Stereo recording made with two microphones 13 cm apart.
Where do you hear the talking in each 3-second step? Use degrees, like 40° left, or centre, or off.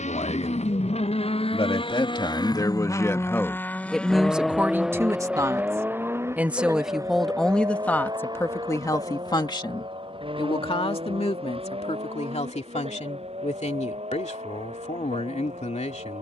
40° left, 10° right, 10° left, 40° left, 60° left, 60° left.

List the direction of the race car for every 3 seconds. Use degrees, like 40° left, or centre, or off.
50° left, centre, 30° right, 40° right, 50° right, 50° right.